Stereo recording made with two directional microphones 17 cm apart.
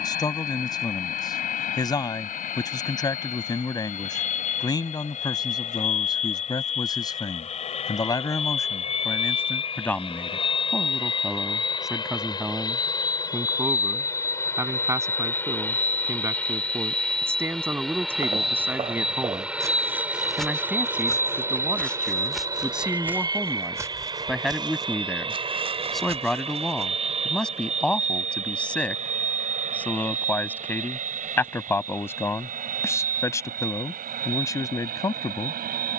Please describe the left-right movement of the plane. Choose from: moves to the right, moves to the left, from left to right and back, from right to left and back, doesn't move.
moves to the right.